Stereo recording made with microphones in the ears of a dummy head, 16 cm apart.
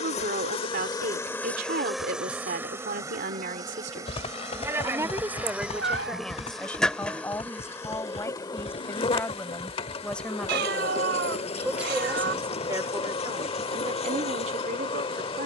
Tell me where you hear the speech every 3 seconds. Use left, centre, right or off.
right, right, centre, centre, right.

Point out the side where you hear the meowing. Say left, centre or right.
right.